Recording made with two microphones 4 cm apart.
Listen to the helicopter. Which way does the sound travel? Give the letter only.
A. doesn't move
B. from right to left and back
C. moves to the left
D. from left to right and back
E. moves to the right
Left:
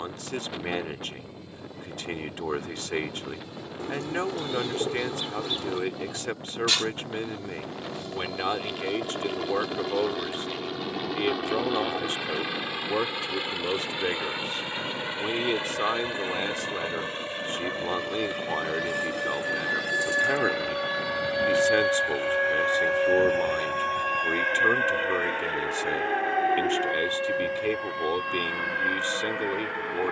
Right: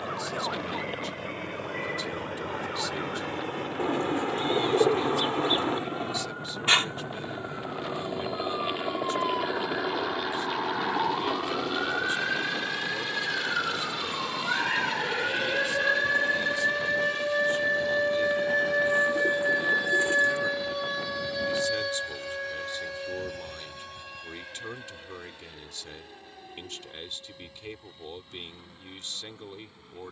C.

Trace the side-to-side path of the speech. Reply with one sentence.
In this clip you hear the speech stay put.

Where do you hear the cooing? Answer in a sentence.
You can hear the cooing on the right.